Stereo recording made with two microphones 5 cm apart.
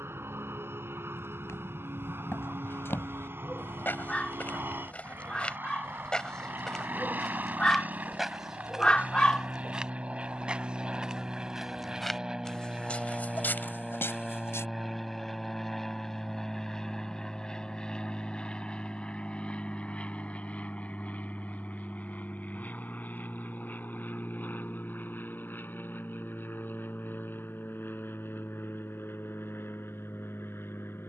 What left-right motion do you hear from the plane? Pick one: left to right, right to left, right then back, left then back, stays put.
right to left.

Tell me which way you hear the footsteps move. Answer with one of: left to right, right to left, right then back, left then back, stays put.
right then back.